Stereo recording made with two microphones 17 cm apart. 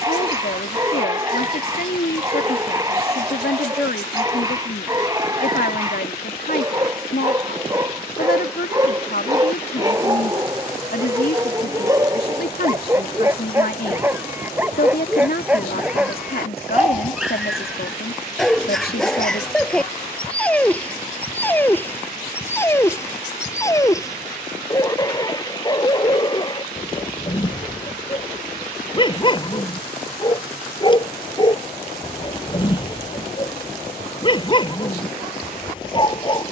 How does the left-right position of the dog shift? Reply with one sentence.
You can hear the dog move to the left.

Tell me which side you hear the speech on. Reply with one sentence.
In this clip you hear the speech on the left.